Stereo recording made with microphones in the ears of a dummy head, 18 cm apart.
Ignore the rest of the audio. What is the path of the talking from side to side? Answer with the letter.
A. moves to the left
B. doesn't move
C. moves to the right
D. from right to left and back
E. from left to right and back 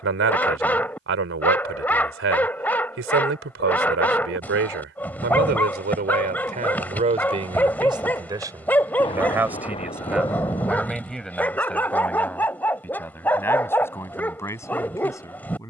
A.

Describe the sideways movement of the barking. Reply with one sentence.
In this clip you hear the barking stay put.